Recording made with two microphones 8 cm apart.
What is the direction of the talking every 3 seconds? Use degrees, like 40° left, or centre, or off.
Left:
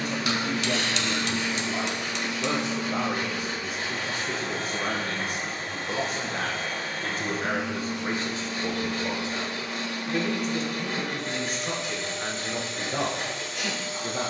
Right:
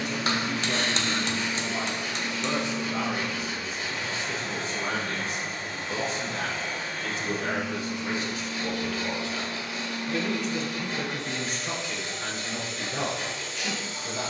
70° left, 60° left, 40° left, 10° left, 50° left.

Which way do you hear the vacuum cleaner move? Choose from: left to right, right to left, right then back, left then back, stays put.
stays put.